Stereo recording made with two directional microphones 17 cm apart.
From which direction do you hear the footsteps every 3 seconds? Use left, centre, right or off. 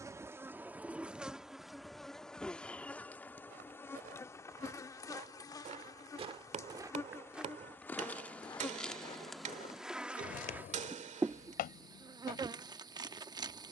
off, right, centre, left, left.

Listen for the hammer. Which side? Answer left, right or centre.
right.